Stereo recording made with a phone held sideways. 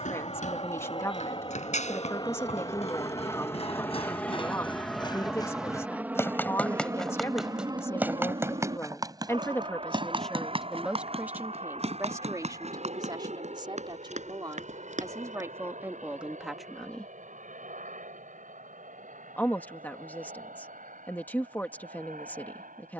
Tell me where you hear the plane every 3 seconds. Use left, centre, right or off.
left, centre, right, right, right, right, right, right.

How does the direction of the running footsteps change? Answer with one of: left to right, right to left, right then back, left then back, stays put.
left to right.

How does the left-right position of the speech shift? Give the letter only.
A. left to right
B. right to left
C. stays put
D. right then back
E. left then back
D.